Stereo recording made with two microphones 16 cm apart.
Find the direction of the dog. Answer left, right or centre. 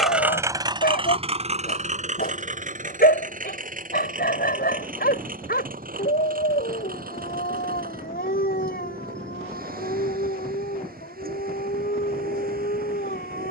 left.